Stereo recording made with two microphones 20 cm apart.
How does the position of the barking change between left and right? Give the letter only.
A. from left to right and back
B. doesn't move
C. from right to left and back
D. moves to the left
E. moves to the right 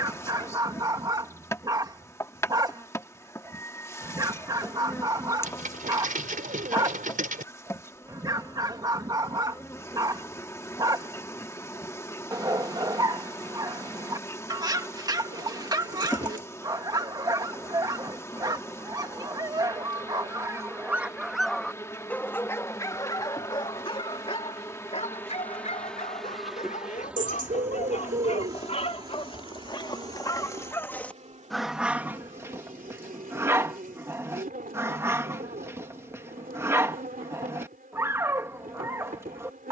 C.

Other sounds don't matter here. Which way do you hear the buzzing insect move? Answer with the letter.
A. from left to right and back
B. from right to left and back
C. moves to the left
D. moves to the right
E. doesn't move
D.